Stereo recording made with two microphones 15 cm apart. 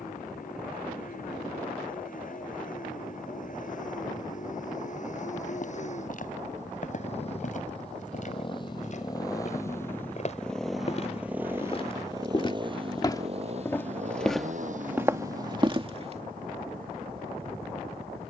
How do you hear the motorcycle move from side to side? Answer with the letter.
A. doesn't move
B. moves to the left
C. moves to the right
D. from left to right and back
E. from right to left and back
C.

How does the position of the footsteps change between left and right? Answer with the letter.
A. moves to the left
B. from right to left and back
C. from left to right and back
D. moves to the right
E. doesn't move
D.